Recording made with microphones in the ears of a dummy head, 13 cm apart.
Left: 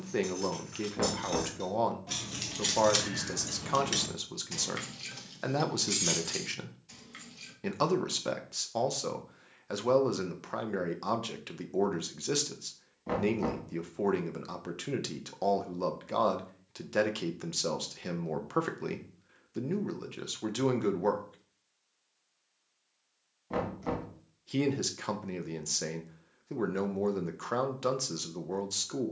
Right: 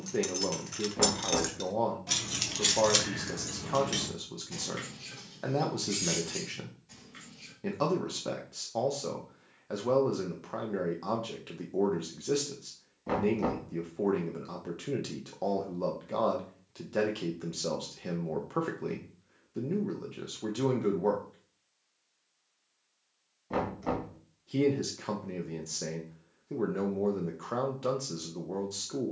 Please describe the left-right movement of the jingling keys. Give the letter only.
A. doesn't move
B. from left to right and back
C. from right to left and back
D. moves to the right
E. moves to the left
E.